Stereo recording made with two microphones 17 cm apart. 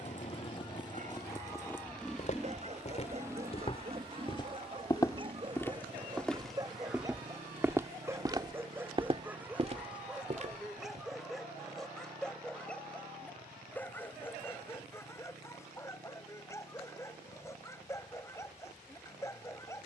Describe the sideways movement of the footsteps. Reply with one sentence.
In this clip you hear the footsteps move from left to right.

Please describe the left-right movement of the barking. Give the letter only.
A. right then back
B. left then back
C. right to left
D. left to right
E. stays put
C.